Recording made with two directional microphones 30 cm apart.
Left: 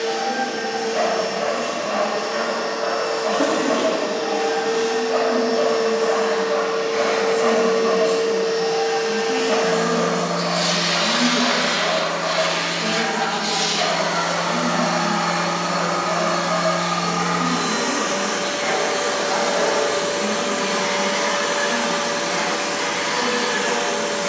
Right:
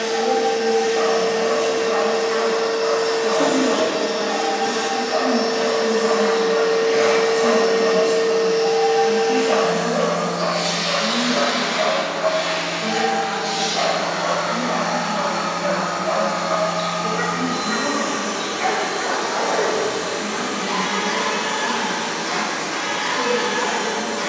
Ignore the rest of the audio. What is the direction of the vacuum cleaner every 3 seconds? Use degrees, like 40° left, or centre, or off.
60° right, 50° right, 20° right, 20° left, 40° left, 40° left, 40° left, 40° left.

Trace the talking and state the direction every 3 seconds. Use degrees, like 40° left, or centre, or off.
60° right, 40° right, 20° right, 10° left, 30° left, 40° left, 50° left, 50° left.